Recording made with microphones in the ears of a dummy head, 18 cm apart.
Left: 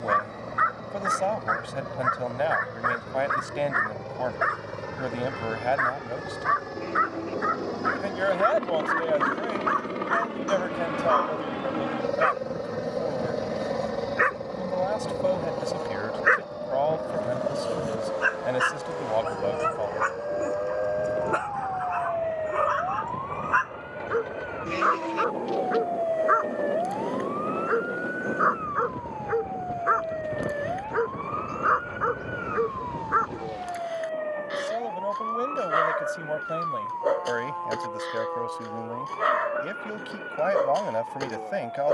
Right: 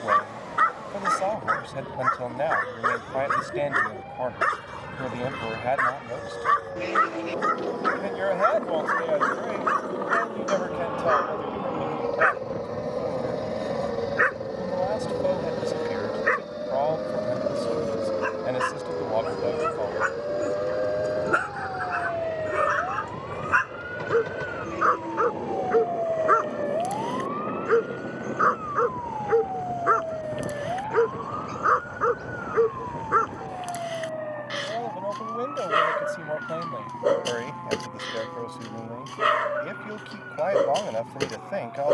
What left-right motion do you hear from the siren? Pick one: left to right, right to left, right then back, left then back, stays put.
right to left.